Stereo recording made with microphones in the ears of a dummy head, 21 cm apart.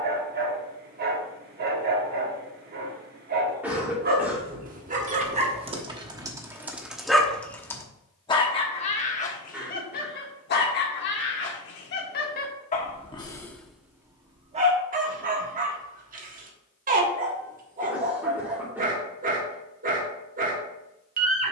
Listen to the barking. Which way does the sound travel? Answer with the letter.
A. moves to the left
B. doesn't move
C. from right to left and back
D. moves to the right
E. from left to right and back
C.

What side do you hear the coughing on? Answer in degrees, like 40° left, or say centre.
10° right.